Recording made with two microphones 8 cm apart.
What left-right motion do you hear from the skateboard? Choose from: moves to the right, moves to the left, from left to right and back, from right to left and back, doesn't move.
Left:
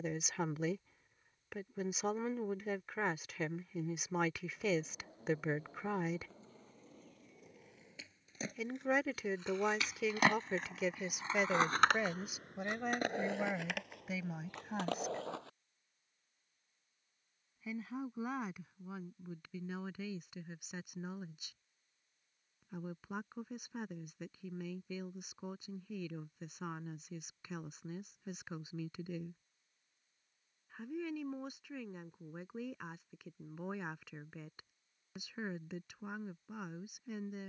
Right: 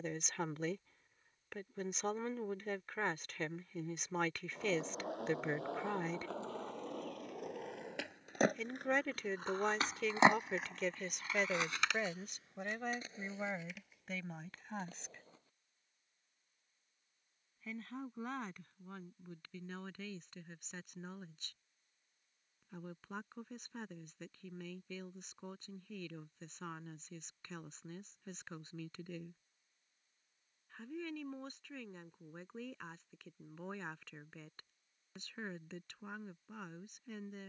moves to the left.